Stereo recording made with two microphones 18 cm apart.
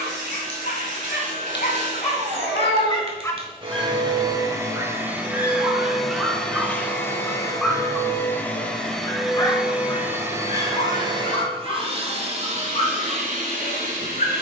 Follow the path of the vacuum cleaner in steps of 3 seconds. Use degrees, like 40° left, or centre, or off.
50° right, 20° right, 10° left, 20° right, 50° right.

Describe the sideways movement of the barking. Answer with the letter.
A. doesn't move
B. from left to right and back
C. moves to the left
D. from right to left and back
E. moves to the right
B.